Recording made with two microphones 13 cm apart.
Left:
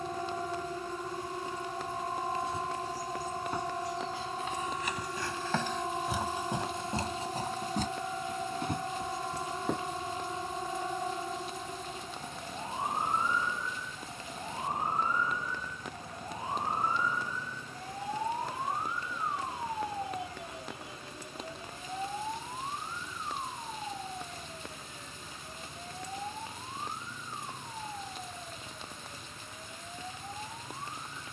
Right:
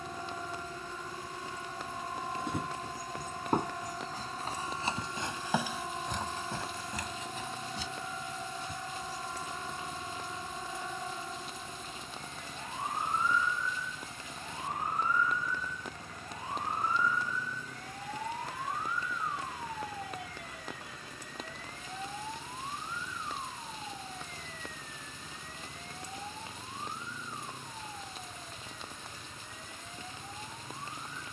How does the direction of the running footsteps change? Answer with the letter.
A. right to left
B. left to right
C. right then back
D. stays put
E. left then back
A.